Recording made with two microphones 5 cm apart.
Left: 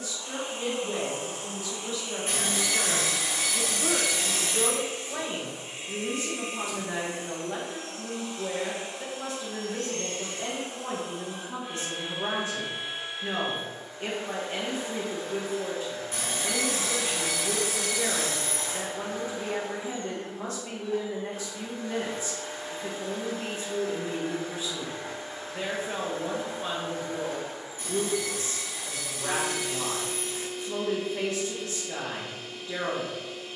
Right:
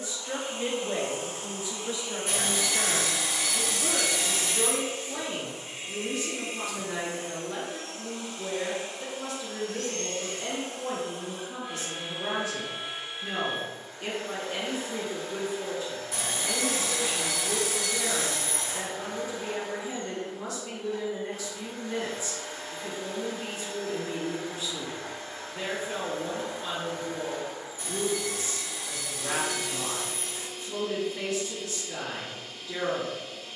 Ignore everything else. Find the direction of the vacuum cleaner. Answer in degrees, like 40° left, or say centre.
20° left.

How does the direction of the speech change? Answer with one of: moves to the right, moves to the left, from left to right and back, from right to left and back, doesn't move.
moves to the left.